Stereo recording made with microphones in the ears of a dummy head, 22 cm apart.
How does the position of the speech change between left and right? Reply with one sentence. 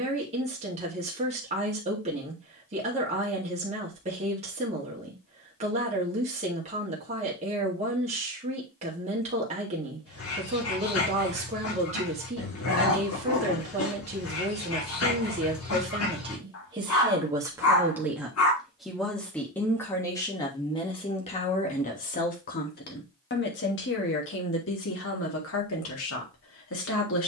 You can hear the speech move to the left.